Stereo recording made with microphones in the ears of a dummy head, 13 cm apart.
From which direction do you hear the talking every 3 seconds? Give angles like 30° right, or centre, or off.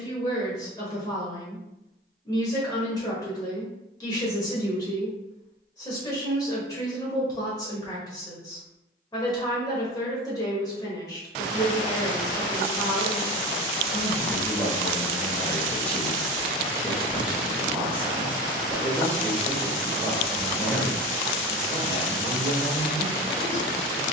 30° left, 30° left, 30° left, 30° left, 30° left, centre, centre, 30° left.